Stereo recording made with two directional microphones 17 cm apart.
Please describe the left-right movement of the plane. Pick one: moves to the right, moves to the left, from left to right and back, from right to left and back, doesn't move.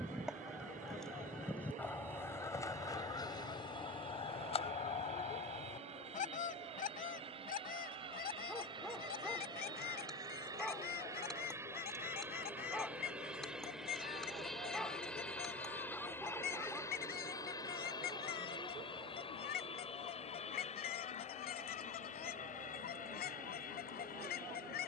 moves to the left.